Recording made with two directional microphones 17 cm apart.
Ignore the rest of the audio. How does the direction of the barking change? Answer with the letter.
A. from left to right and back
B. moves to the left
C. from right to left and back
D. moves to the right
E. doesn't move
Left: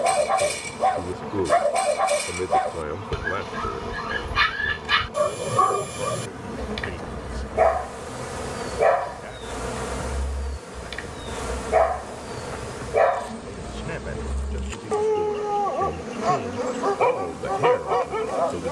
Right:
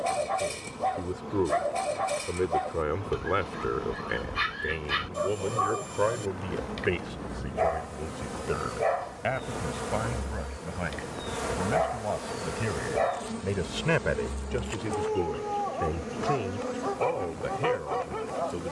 E.